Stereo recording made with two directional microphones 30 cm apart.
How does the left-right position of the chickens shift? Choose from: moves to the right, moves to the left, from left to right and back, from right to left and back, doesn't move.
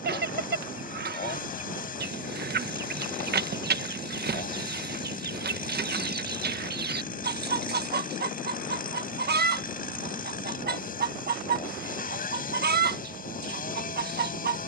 doesn't move.